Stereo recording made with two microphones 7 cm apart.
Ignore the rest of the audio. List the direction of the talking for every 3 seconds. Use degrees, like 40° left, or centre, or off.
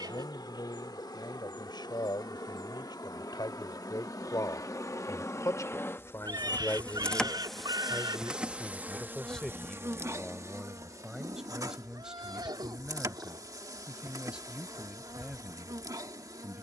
80° left, 60° left, 30° left, centre, 10° right, 10° right.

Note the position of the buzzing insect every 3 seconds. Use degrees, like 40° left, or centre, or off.
70° left, 50° left, centre, 40° right, 50° right, 50° right.